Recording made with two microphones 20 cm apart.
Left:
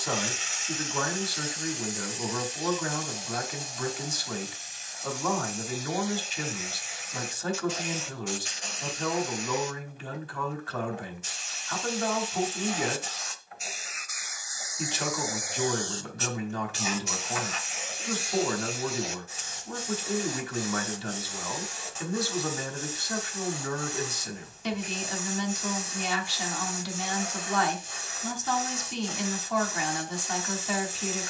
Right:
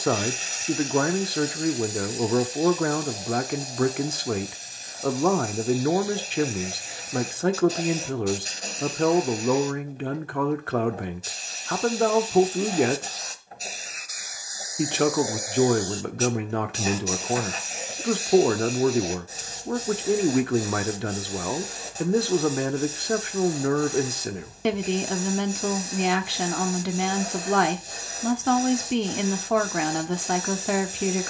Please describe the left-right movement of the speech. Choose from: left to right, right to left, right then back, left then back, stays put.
stays put.